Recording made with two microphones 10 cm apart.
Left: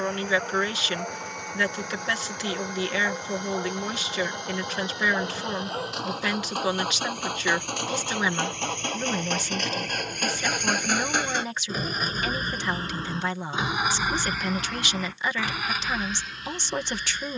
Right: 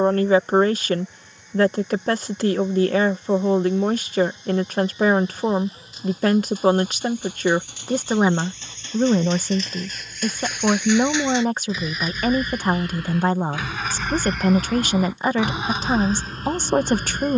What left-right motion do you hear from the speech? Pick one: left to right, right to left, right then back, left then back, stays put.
stays put.